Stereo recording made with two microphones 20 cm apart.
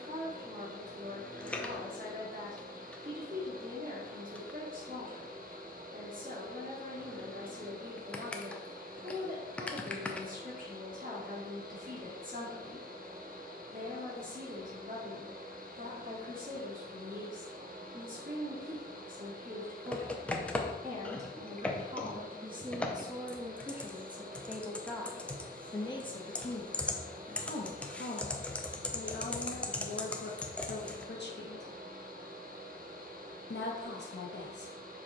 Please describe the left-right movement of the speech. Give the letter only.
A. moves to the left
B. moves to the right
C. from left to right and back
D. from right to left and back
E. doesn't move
A.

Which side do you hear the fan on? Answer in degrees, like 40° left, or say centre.
40° right.